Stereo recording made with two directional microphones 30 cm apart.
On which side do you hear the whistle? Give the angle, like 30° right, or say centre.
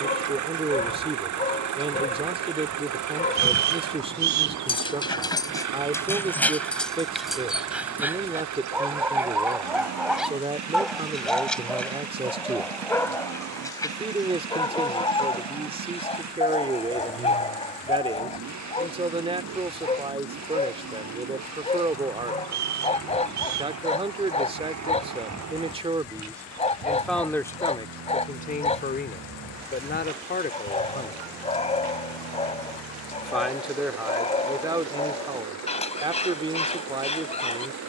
60° right.